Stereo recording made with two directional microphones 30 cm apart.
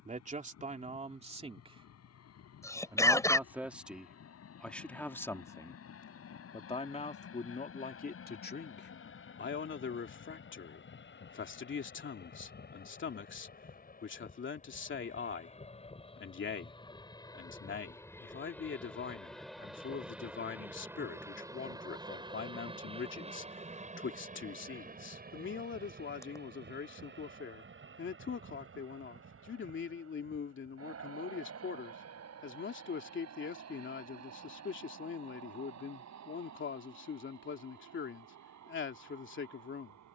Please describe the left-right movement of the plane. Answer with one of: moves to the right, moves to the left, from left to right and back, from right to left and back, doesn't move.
moves to the right.